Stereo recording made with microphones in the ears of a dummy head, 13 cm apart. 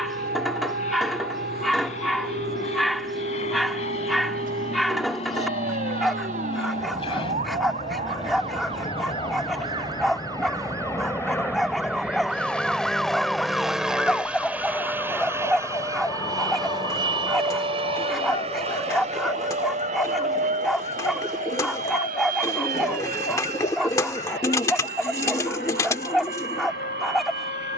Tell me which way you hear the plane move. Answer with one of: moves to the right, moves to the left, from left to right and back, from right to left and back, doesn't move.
moves to the right.